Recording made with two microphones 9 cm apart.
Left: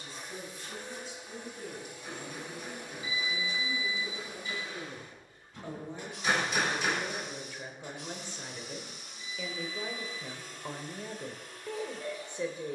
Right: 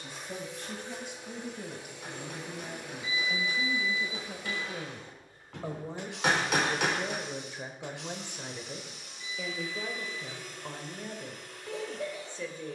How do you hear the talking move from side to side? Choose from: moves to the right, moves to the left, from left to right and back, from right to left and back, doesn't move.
moves to the left.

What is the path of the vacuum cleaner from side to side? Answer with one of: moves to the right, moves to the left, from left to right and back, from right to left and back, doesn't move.
doesn't move.